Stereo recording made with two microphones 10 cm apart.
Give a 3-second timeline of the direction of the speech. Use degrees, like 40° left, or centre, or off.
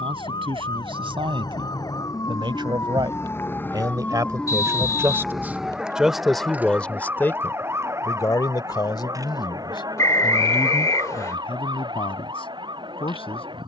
60° right, 30° right, 20° left, 60° left, 70° left.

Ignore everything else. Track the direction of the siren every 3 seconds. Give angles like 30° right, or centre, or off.
40° left, 10° left, 20° right, 40° right, 50° right.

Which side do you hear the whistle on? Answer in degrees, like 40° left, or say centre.
30° left.